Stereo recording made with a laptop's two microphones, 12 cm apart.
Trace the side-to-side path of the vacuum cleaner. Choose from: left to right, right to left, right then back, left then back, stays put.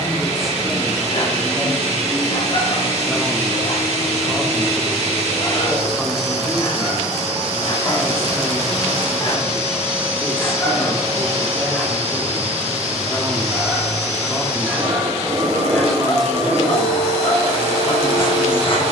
stays put.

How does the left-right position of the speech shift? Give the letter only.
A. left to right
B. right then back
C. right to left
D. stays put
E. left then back
D.